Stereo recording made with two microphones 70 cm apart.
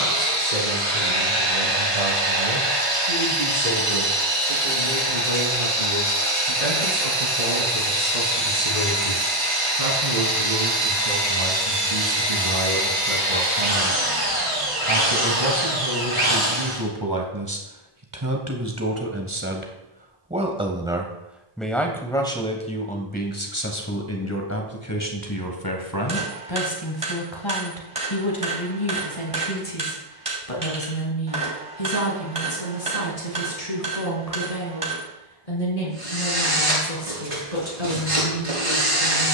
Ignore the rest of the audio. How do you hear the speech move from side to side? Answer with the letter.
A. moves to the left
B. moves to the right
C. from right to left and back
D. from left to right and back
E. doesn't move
A.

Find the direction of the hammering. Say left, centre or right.
right.